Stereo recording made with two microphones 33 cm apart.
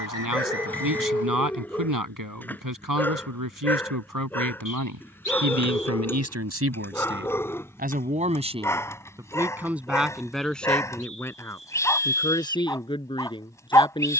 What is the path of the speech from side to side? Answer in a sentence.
In this clip you hear the speech travel towards the left.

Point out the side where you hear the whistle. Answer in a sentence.
In this clip you hear the whistle on the left.